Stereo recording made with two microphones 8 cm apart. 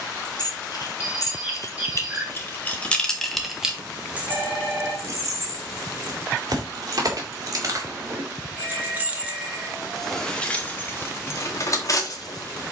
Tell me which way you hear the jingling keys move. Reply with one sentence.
You can hear the jingling keys move from left to right and back again.